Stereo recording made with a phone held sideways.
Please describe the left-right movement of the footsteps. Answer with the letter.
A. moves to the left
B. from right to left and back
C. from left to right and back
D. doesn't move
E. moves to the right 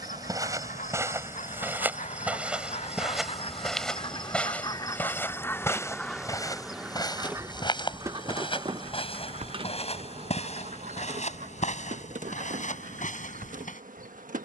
A.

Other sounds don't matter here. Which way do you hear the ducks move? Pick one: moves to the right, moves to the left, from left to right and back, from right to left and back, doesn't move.
moves to the right.